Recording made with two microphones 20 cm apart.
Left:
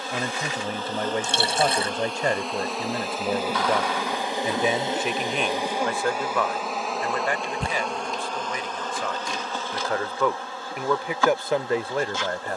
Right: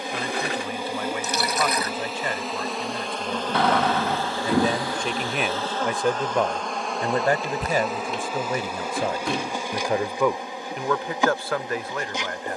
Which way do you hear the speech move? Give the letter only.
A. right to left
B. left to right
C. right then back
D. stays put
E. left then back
C.